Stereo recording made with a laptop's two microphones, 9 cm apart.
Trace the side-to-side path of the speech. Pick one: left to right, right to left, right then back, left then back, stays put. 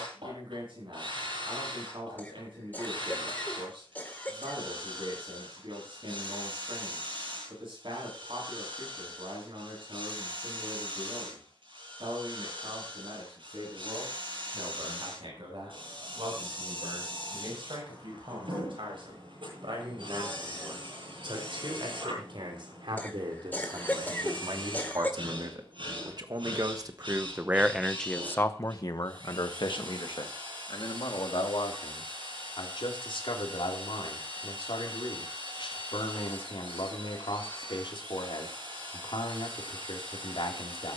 right to left.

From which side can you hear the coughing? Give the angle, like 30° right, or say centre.
20° left.